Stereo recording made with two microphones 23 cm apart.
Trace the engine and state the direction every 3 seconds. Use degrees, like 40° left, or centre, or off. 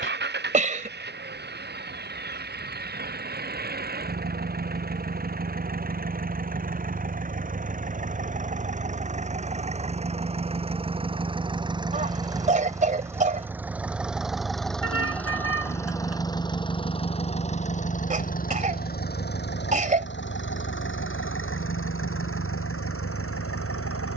50° right, 40° right, 40° right, 30° right, 10° right, 20° left, 50° left, 70° left.